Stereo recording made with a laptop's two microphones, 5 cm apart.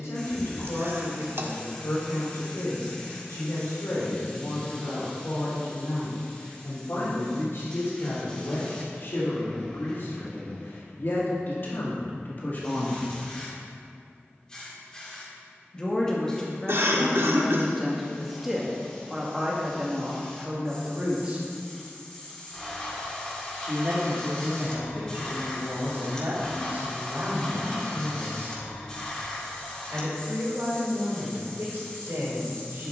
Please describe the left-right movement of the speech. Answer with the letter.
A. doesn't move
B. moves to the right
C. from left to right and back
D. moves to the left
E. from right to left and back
B.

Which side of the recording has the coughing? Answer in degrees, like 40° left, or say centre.
60° right.